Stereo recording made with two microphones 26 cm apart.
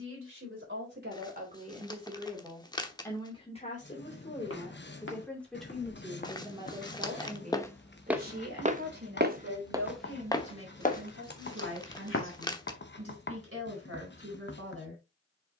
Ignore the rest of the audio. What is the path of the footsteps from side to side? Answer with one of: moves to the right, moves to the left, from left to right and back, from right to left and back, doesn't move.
from left to right and back.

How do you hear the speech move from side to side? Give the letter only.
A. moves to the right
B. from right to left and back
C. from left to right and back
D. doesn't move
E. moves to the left
B.